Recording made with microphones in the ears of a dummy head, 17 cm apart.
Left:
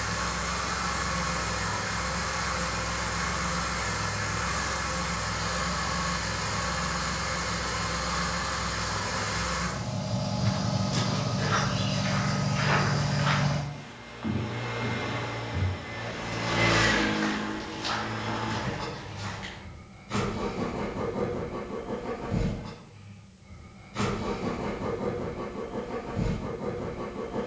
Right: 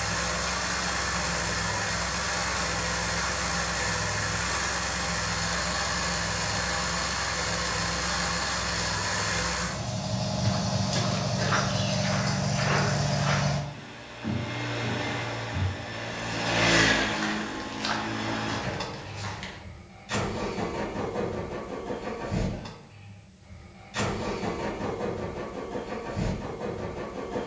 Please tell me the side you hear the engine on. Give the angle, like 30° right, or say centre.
60° right.